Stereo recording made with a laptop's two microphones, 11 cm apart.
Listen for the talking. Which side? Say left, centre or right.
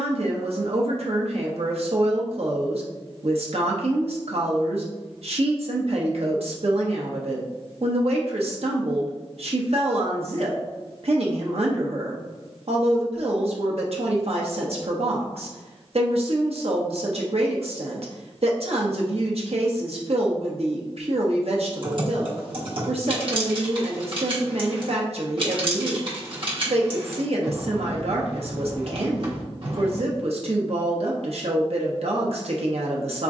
right.